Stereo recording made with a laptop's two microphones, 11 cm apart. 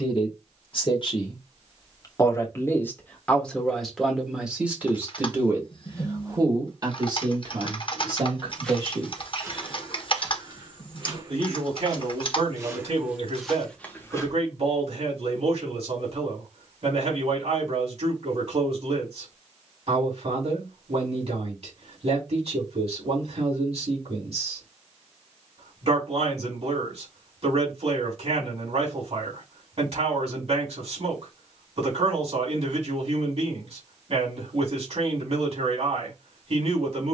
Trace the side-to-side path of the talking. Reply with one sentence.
You can hear the talking move to the right.